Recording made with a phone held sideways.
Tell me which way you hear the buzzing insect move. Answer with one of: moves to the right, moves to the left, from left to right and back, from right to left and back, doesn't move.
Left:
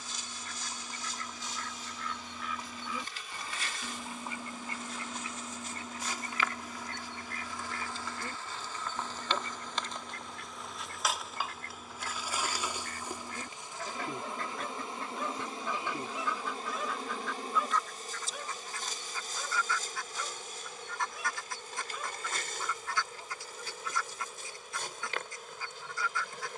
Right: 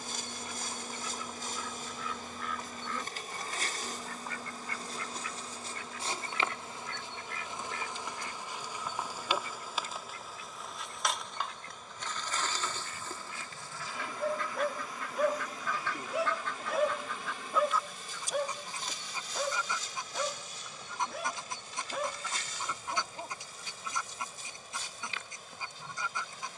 moves to the left.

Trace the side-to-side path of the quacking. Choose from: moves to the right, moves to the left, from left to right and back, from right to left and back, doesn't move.
from right to left and back.